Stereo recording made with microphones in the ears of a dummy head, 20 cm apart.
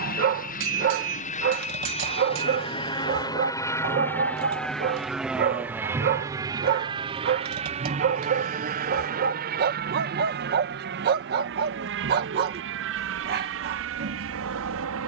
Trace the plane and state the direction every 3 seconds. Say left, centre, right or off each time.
left, centre, right, right, right.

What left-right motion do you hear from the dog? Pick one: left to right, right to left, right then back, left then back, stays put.
stays put.